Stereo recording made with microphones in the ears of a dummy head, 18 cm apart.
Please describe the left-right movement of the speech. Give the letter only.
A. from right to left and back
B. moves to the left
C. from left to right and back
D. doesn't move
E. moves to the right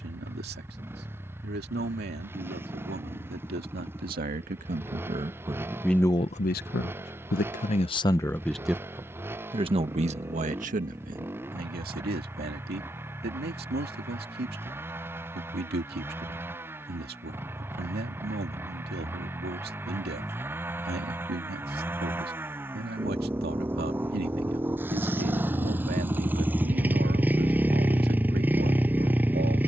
A.